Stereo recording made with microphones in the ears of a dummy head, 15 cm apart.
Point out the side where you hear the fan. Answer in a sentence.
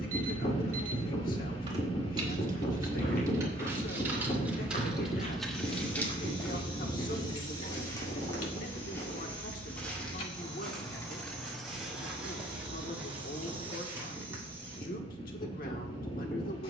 In this clip you hear the fan on the left.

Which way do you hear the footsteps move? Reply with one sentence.
In this clip you hear the footsteps move from left to right.